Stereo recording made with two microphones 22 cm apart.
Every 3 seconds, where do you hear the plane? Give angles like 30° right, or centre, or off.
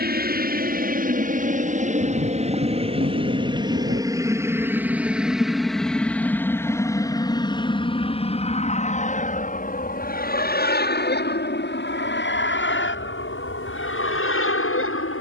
40° right, 10° right, 20° left, 40° left, 50° left.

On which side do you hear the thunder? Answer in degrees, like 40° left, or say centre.
50° right.